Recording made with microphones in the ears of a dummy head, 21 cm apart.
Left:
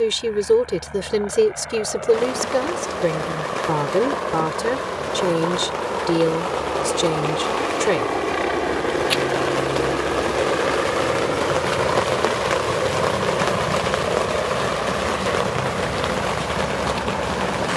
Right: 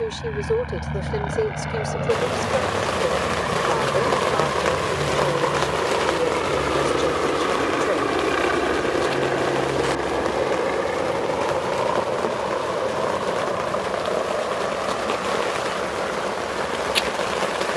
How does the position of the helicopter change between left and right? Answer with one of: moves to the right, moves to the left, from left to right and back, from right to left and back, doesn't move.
moves to the left.